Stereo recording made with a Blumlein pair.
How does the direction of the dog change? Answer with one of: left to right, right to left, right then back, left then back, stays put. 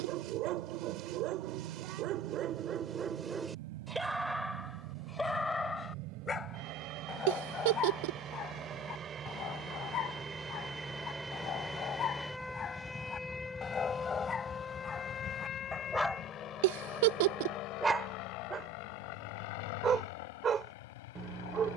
left then back.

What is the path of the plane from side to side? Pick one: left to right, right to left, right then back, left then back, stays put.
right to left.